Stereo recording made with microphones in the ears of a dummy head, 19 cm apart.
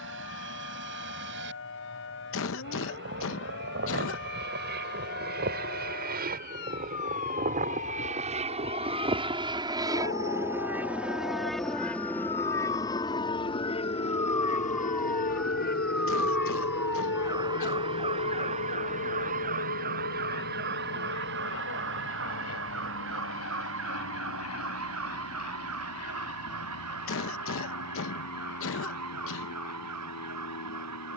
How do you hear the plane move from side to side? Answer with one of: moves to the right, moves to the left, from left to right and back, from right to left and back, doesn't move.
moves to the left.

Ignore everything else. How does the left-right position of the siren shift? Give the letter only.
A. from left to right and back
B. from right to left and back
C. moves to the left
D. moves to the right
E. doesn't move
D.